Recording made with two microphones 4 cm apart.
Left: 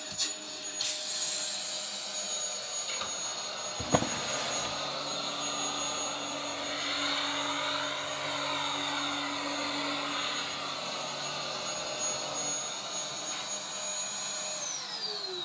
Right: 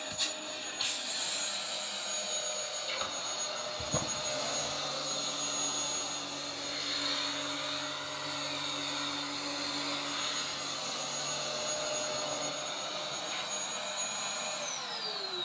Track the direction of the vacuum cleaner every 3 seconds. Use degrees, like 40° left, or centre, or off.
20° right, 10° left, 40° left, 20° left, 10° right.